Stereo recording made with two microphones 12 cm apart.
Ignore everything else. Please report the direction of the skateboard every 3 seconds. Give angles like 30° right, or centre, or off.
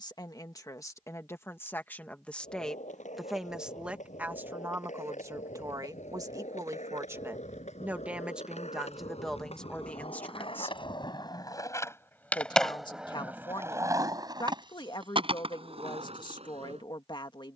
80° left, 80° left, 70° left, 50° left, 20° right, 50° right.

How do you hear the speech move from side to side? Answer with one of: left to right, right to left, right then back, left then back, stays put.
right then back.